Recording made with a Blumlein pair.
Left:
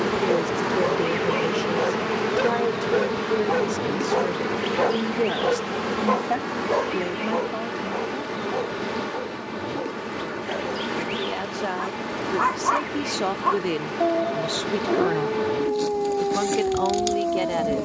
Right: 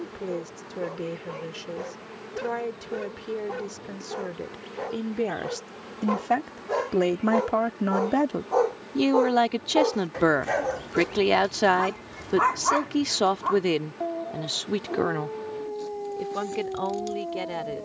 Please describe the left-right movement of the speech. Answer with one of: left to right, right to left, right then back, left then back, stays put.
right then back.